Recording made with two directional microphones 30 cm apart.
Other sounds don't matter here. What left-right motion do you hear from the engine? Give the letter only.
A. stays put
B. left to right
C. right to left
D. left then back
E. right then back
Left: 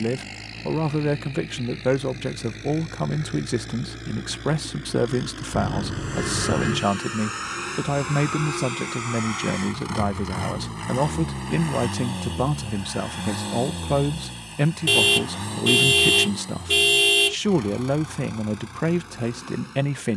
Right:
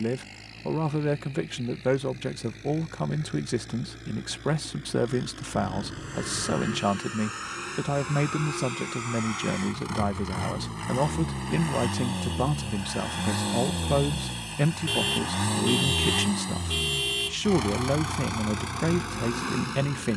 B.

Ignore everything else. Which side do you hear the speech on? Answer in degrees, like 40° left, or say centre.
10° left.